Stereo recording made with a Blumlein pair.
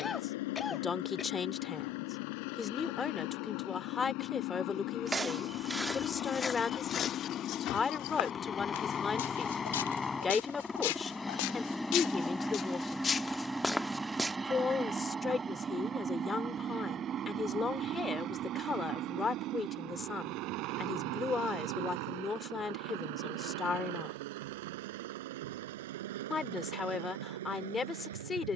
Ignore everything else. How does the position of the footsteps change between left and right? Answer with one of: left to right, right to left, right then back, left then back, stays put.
left then back.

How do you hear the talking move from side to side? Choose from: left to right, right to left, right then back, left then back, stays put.
stays put.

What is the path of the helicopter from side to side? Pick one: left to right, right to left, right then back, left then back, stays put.
left to right.